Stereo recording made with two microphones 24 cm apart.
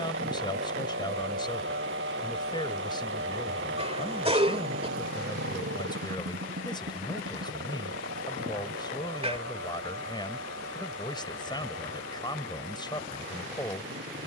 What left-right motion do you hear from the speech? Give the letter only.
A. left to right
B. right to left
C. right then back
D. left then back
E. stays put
E.